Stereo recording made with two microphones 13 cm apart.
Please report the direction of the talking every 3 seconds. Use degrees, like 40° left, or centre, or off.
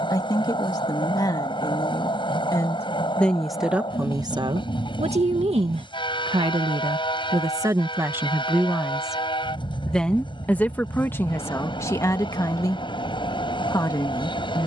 30° left, 30° right, 20° right, 10° left, 30° left.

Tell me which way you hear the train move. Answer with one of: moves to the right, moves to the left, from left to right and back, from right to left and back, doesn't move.
doesn't move.